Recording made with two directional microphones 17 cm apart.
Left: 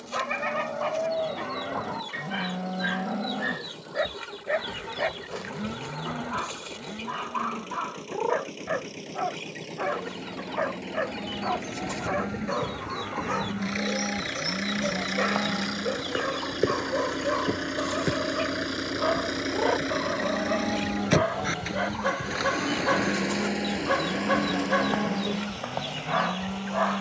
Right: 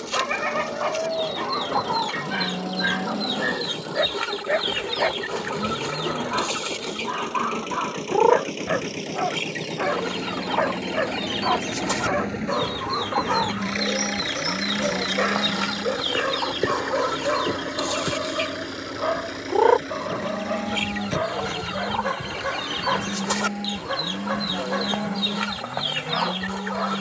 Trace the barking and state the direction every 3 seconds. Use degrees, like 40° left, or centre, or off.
20° right, 20° right, 20° right, 20° right, 20° right, 20° right, 10° right, 10° left, 20° left.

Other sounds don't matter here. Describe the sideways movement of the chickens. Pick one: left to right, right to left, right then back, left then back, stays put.
stays put.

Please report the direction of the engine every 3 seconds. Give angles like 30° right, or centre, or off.
60° right, 60° right, 50° right, 40° right, 20° right, centre, 30° left, 50° left, 60° left.